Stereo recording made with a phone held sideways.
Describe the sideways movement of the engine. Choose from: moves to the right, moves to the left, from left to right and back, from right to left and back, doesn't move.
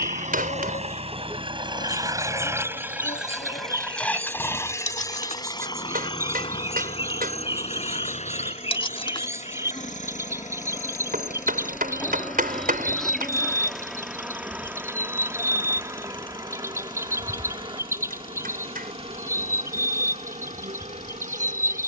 moves to the left.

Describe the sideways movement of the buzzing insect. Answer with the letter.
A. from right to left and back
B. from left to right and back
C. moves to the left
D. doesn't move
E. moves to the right
E.